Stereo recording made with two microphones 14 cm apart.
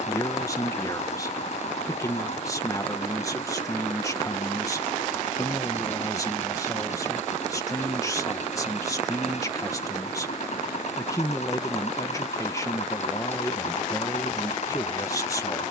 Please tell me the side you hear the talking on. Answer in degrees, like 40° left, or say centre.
20° left.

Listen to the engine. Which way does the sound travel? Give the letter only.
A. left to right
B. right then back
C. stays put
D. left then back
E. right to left
C.